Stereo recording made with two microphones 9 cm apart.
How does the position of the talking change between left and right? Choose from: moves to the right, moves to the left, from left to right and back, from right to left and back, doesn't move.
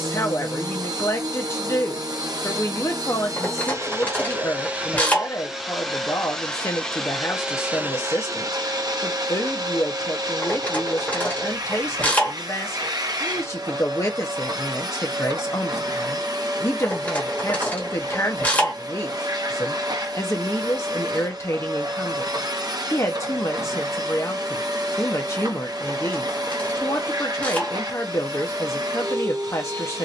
doesn't move.